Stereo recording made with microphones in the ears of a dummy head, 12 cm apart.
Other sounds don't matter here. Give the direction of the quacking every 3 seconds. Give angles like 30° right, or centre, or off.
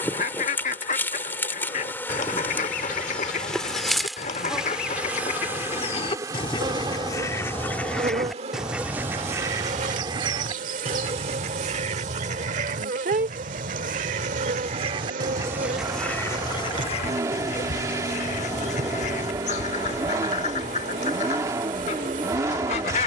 50° left, 50° left, 10° left, 30° right, 50° right, 20° left, 50° left, 50° left.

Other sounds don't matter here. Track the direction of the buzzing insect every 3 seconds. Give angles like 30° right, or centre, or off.
10° left, centre, 40° right, 60° right, 60° right, 60° right, 60° right, 60° right.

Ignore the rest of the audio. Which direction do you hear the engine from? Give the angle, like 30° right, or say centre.
20° right.